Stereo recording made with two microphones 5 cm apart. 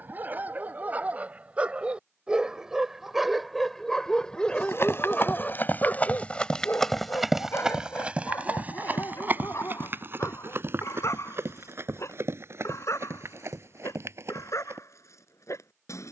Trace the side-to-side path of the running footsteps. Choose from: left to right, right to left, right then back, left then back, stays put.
left to right.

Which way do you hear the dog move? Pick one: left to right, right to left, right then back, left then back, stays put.
right to left.